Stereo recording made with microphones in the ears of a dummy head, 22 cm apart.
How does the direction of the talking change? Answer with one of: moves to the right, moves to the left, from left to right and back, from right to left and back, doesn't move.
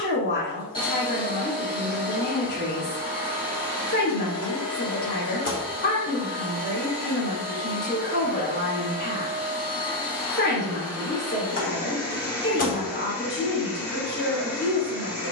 doesn't move.